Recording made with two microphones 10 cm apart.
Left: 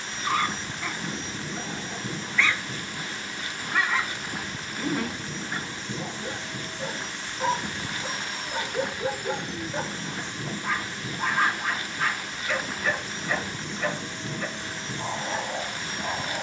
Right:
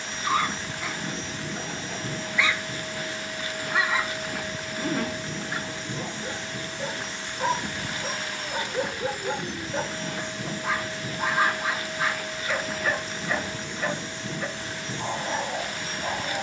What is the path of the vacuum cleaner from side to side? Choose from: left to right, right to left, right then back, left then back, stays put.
stays put.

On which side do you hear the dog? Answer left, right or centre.
centre.